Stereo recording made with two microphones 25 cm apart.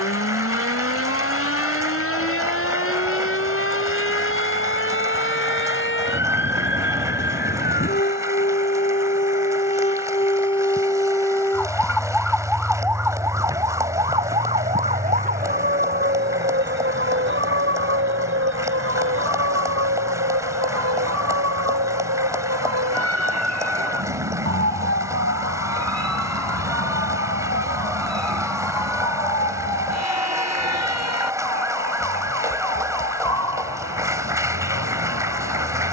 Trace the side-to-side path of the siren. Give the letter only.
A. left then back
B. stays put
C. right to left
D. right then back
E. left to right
E.